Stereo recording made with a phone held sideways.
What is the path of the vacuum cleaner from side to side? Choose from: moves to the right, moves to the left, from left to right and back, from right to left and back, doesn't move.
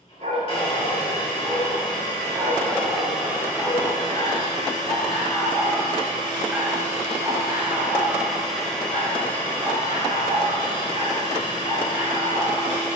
from left to right and back.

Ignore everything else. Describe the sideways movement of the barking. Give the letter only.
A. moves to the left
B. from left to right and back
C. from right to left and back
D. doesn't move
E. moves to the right
C.